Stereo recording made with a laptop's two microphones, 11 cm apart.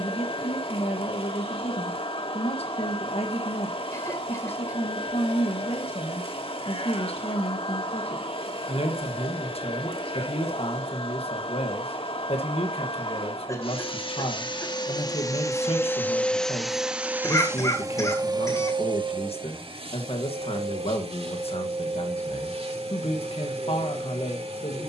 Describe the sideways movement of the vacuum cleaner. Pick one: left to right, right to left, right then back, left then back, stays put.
left to right.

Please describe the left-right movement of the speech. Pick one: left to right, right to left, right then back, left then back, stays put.
stays put.